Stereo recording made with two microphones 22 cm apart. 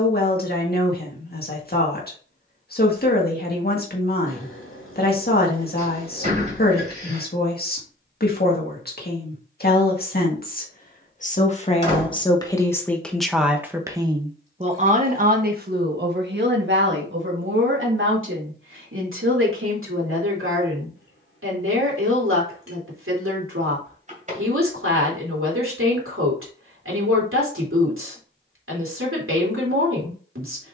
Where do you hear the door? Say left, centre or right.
right.